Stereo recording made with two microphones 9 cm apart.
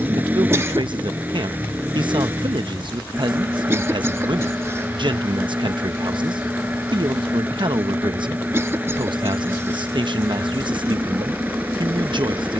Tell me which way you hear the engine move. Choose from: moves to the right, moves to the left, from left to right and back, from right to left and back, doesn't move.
doesn't move.